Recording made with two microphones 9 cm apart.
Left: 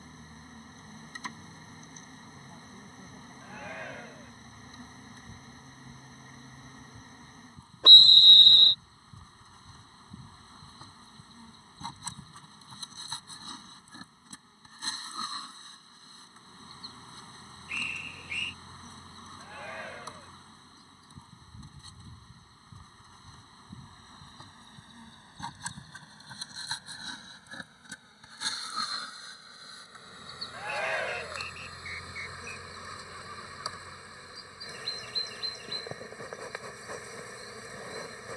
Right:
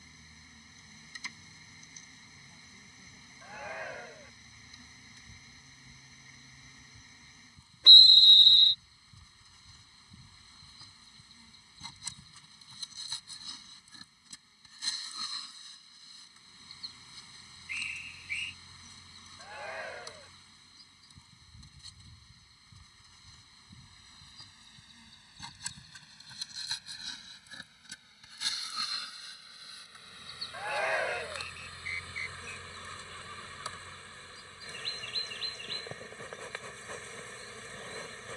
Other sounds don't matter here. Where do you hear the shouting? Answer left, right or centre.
centre.